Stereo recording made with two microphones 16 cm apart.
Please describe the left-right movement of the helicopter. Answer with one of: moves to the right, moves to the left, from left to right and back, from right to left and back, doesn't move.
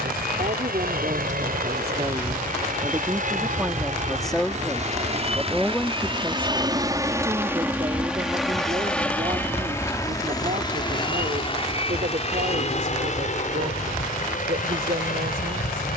moves to the left.